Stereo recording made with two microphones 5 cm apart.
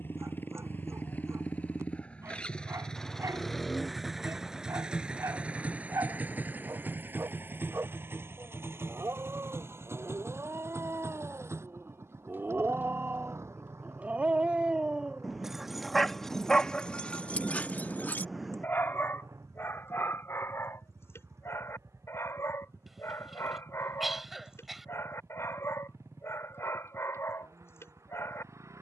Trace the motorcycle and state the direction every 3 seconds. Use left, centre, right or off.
left, centre, right, right, right, right, right, right, right, right.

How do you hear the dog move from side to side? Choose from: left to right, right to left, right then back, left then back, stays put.
right to left.